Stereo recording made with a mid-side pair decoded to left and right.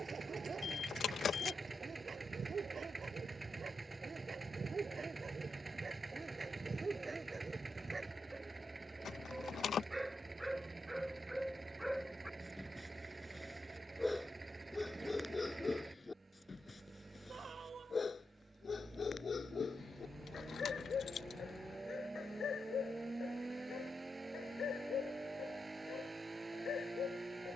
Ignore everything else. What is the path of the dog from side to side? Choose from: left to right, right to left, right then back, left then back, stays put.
right to left.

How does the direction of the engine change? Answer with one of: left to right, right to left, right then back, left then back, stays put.
stays put.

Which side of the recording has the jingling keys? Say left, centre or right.
left.